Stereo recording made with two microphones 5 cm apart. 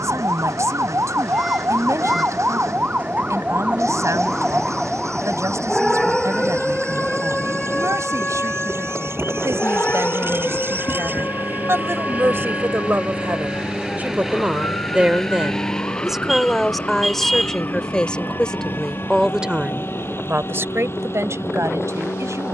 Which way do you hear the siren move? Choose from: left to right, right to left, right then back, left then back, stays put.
right to left.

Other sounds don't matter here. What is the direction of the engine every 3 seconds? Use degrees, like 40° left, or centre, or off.
80° right, 70° right, 60° right, 40° right, 20° right, 20° left, 40° left, 50° left.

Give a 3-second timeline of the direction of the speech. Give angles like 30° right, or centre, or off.
70° right, 70° right, 70° right, 60° right, 40° right, centre, 20° right, 70° right.